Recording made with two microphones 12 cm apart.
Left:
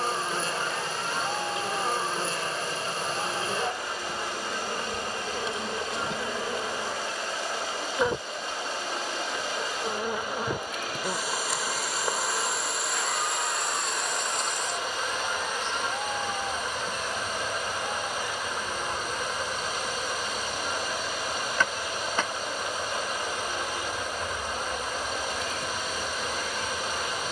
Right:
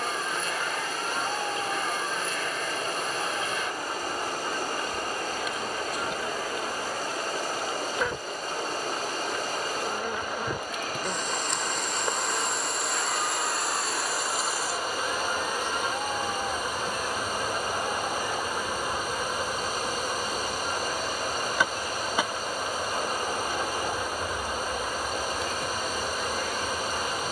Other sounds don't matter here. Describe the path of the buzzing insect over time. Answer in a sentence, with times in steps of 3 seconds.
You can hear the buzzing insect on the left from 0 s and in the centre from 9 s.